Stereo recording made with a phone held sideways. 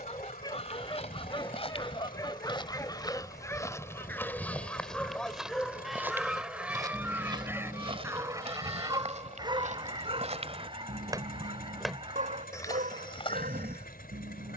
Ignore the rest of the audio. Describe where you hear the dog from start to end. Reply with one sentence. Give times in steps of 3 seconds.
In this clip you hear the dog on the left from 0 s, in the centre from 3 s and on the right from 9 s.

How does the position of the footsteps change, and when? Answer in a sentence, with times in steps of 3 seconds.
In this clip you hear the footsteps on the left from 0 s, in the centre from 3 s, on the right from 6 s and on the left from 12 s.